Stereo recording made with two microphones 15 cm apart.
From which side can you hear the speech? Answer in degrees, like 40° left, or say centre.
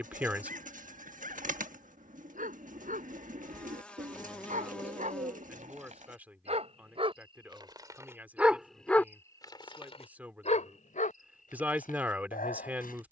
10° right.